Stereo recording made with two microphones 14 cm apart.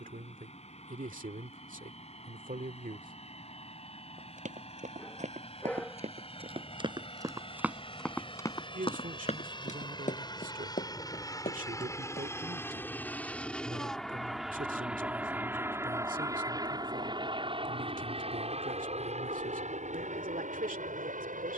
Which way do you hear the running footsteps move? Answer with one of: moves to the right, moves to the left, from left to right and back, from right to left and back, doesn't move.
moves to the left.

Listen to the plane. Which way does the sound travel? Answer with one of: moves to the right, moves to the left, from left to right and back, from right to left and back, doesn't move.
moves to the right.